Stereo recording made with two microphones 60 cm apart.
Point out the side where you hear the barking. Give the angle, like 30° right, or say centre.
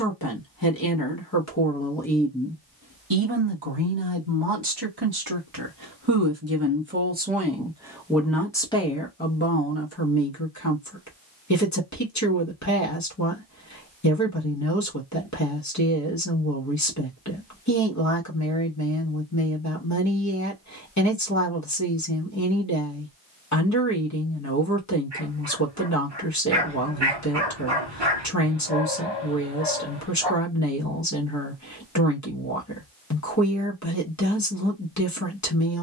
40° right.